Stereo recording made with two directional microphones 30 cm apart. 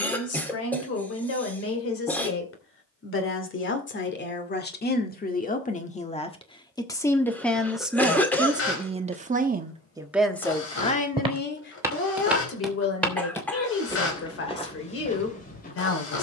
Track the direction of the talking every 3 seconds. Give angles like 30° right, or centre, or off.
50° left, 30° left, centre, 10° left, 50° left, 50° left.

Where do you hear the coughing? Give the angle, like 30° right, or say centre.
10° left.